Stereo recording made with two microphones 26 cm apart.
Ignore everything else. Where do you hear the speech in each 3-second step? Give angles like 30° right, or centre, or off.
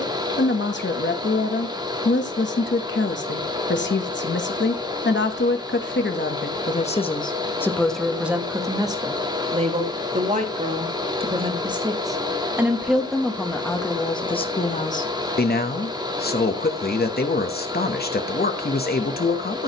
50° left, 50° left, 10° left, 20° right, 10° left, 40° left, 40° left.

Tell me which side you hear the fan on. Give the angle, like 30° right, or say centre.
20° right.